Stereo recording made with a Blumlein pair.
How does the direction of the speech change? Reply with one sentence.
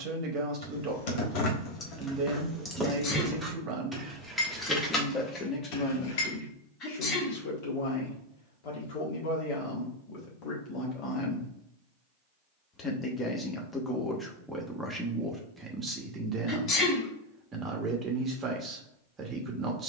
In this clip you hear the speech move from right to left and back again.